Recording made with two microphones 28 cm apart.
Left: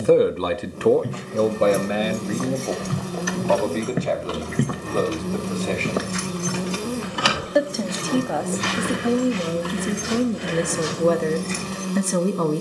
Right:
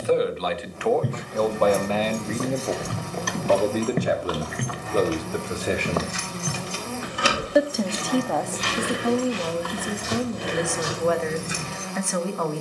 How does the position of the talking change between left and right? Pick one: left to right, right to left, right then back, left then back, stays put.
right then back.